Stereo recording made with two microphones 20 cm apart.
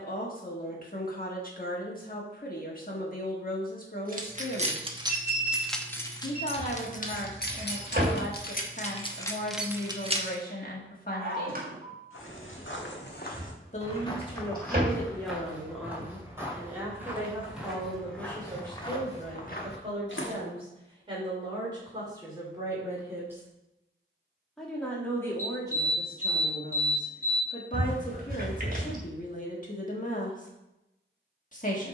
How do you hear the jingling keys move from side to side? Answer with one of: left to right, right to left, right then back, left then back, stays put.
left then back.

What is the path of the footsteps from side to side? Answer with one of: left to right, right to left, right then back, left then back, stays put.
right then back.